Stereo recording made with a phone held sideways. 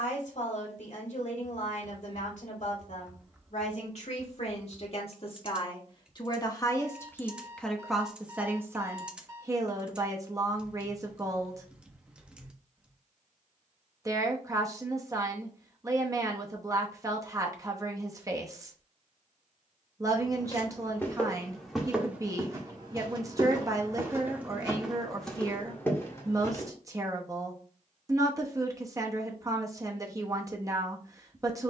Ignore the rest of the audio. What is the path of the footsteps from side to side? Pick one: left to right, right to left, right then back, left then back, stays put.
right then back.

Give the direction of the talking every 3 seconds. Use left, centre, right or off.
left, left, centre, right, right, right, right, right, right, right, right.